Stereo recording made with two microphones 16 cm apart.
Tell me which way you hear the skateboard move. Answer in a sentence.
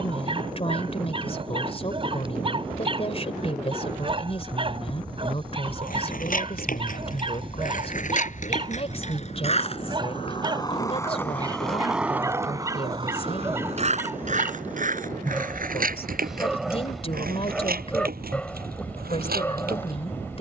In this clip you hear the skateboard move to the right.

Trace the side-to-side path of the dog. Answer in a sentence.
In this clip you hear the dog go from the right side to the left.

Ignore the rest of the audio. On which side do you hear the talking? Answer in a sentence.
You can hear the talking on the left.